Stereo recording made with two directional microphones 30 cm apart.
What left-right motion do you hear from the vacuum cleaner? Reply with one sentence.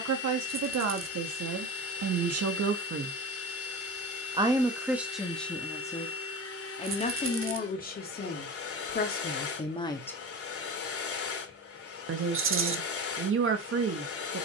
You can hear the vacuum cleaner stay put.